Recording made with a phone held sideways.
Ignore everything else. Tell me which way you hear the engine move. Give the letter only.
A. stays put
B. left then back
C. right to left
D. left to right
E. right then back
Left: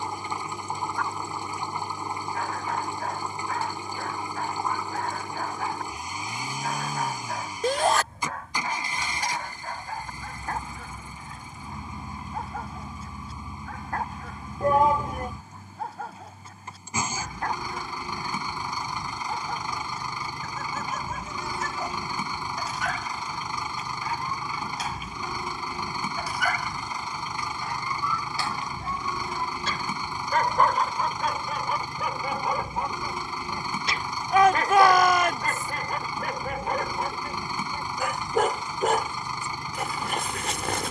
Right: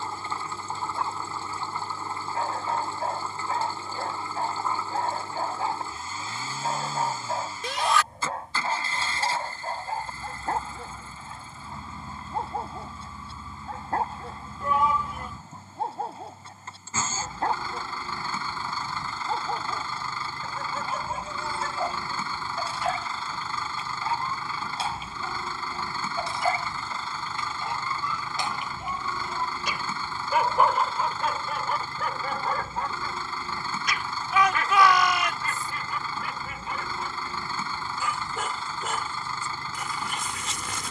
A.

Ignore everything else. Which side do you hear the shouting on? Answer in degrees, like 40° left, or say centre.
50° left.